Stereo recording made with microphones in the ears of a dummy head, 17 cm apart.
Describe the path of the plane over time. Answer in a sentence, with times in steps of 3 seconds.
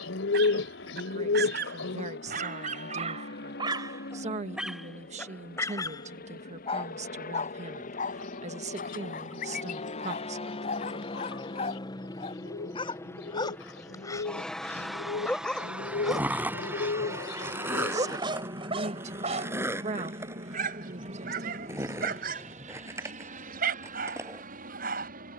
You can hear the plane on the left from 0 s, in the centre from 12 s and on the right from 18 s.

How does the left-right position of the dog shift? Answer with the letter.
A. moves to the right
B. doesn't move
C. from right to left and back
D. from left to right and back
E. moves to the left
C.